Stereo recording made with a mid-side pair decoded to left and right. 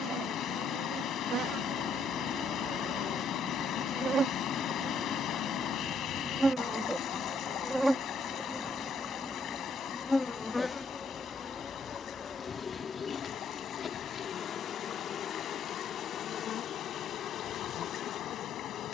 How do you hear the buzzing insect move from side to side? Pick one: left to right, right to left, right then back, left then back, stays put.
right to left.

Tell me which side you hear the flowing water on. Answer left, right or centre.
left.